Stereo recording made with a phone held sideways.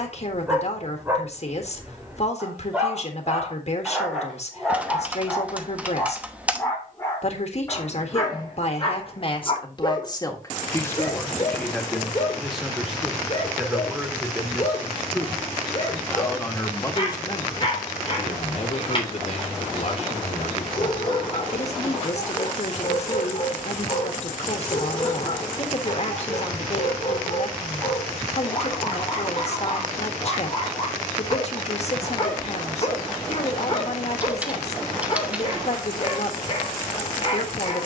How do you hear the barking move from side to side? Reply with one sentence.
In this clip you hear the barking go from the right side to the left.